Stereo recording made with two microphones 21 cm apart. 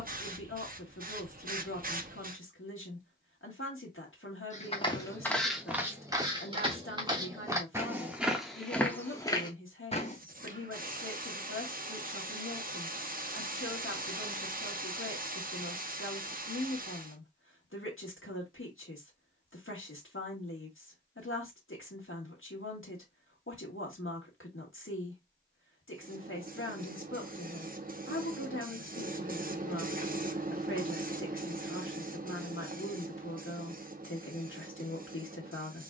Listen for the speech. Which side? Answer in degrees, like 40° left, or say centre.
70° left.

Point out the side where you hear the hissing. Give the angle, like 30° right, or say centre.
40° right.